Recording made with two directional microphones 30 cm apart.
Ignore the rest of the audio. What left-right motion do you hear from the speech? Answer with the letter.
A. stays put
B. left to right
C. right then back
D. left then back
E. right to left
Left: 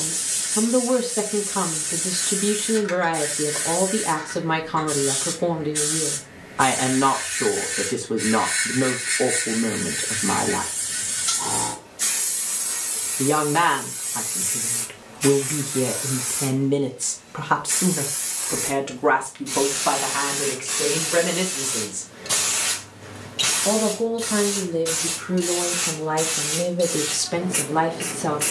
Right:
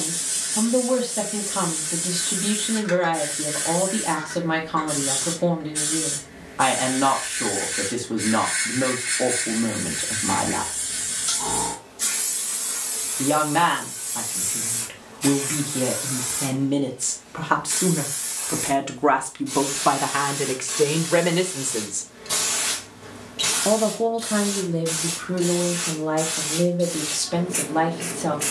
C.